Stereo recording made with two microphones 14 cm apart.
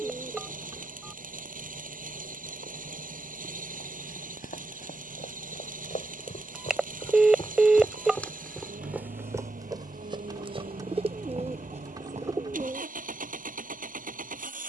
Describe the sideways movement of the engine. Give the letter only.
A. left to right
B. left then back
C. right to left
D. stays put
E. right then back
D.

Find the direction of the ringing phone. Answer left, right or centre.
centre.